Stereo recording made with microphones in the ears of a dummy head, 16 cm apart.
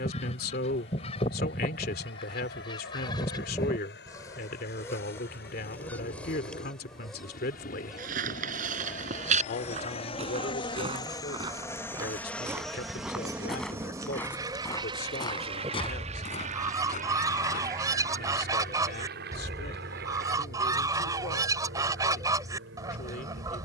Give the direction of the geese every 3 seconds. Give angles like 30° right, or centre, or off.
30° left, 20° left, centre, 20° right, 20° right, 20° right, 20° right, 20° right.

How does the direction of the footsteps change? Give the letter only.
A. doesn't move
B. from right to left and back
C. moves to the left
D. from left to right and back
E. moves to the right
C.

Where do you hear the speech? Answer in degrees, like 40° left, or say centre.
60° left.